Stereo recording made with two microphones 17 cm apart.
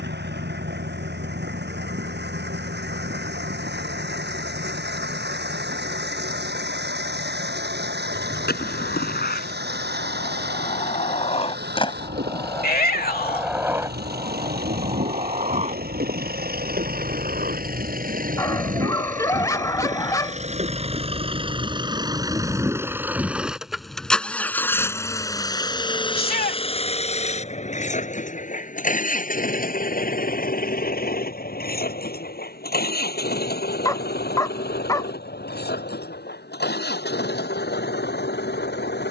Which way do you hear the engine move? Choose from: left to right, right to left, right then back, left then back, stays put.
right to left.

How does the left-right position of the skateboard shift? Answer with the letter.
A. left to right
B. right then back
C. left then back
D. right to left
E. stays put
A.